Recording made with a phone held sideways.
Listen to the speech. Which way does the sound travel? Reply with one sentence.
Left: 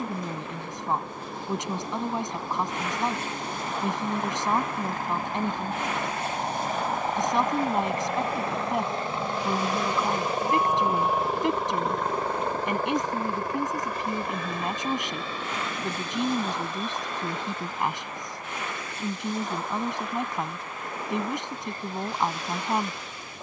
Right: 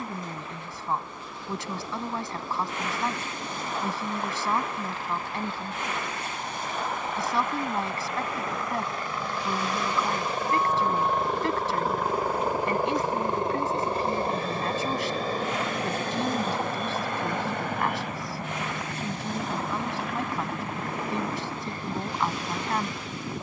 You can hear the speech stay put.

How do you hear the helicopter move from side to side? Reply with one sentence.
You can hear the helicopter travel towards the right.